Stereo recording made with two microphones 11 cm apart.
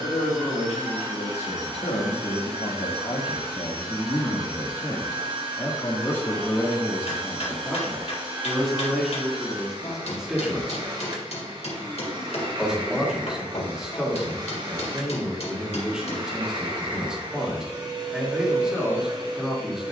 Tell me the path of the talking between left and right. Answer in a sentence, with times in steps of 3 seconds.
In this clip you hear the talking on the left from 0 s and in the centre from 6 s.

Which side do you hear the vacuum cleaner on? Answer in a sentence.
In this clip you hear the vacuum cleaner on the right.